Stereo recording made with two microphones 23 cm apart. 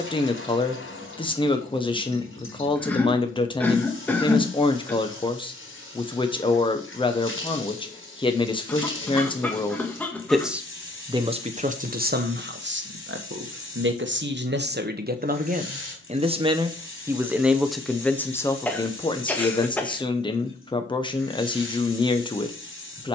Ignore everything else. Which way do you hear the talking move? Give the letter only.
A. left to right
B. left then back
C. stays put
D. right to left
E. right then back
E.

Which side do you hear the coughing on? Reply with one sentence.
In this clip you hear the coughing in the centre.